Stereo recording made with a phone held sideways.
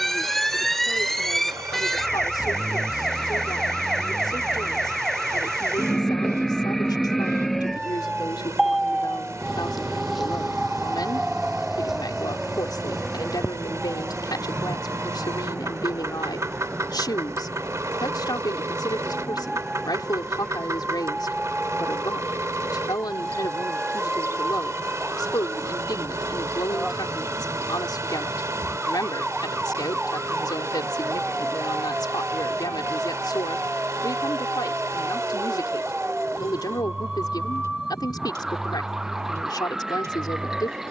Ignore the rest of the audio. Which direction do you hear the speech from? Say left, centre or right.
left.